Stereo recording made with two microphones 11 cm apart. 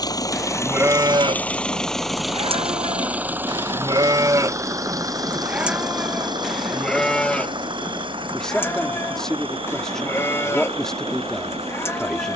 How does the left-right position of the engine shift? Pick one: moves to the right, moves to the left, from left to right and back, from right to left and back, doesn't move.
moves to the right.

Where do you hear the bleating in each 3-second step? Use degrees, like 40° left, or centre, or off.
40° right, 30° right, 10° left, 20° left.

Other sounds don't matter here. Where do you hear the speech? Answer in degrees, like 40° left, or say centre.
10° left.